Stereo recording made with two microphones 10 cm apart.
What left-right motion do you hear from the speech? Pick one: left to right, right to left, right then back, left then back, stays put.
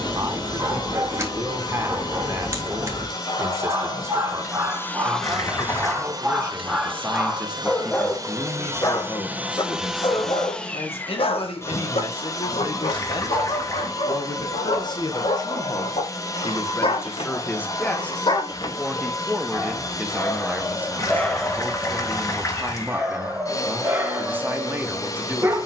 left then back.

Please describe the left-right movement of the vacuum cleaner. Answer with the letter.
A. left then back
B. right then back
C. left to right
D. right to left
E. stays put
B.